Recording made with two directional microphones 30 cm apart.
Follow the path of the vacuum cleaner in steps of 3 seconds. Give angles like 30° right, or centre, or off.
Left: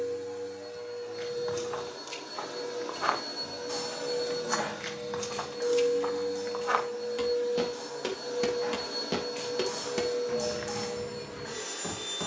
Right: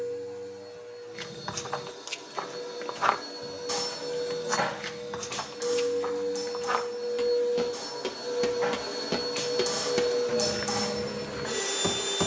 20° left, 10° left, 10° right, 40° right.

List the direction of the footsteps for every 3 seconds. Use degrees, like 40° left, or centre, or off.
50° right, 20° right, centre, 30° right.